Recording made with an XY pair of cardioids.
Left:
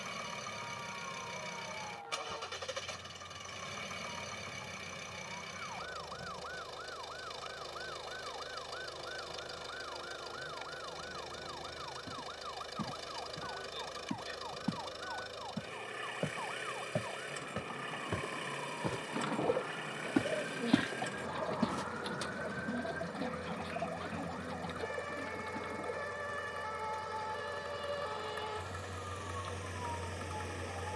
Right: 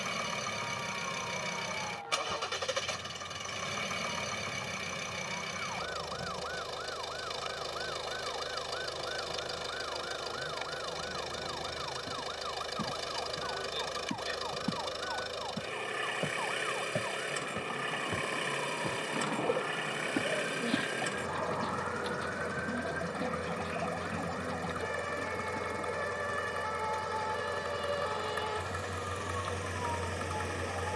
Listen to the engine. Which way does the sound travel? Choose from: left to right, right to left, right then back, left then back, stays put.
stays put.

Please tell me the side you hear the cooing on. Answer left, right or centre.
centre.